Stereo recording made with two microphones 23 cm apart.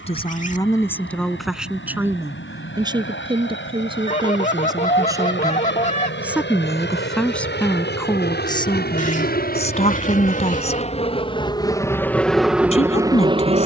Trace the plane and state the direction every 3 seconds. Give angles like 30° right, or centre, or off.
70° left, 60° left, 60° left, 30° left, 10° right.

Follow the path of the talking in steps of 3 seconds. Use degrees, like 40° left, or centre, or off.
centre, 20° right, 10° left, 30° left, 30° left.